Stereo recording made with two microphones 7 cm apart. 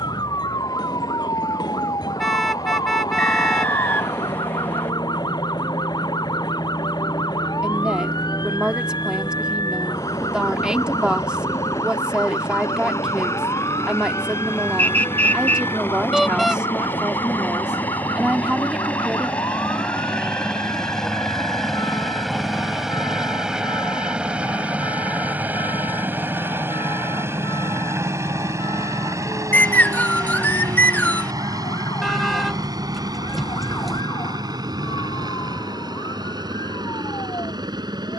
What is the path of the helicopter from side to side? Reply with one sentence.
In this clip you hear the helicopter go from the left side to the right.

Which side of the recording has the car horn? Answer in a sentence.
You can hear the car horn in the centre.